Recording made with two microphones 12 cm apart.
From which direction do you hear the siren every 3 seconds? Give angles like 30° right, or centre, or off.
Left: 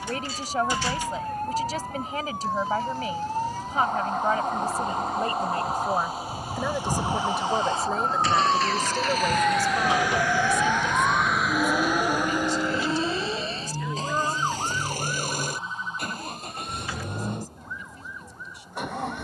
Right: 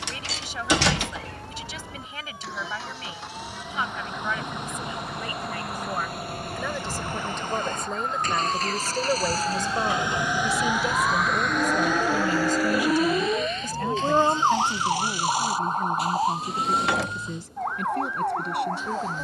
50° left, 50° left, 40° left, 10° left, 30° right, 60° right, 70° right.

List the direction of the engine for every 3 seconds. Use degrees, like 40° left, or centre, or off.
80° right, 70° right, 50° right, 10° right, 30° left, 50° left, 60° left.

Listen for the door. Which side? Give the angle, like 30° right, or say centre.
80° right.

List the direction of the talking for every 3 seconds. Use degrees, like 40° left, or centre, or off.
40° left, 40° left, 10° left, 30° right, 50° right, 70° right, 70° right.